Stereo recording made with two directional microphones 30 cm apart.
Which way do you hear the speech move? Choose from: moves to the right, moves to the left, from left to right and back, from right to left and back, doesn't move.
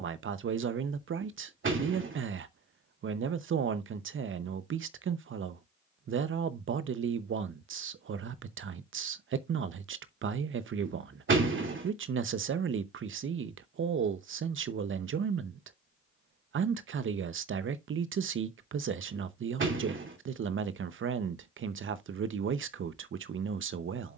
doesn't move.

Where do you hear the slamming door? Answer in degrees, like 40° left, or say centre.
40° right.